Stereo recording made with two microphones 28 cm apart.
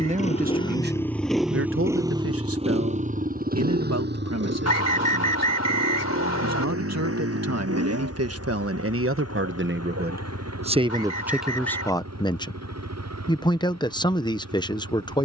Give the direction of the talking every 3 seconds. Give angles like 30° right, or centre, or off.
40° right, 60° right, 60° right, 20° right, 20° left.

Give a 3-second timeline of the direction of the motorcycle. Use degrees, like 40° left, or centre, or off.
centre, 40° right, 50° right, 60° right, 60° right.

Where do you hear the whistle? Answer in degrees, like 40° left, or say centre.
60° left.